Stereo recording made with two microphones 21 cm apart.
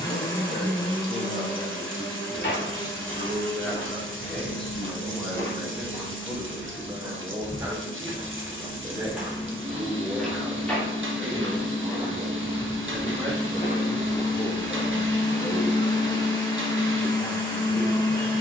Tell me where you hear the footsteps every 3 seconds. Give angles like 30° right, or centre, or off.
60° left, 30° left, 10° right, centre, 30° left, off.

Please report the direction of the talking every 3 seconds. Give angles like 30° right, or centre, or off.
30° left, centre, 10° right, 10° right, 10° left, 40° left.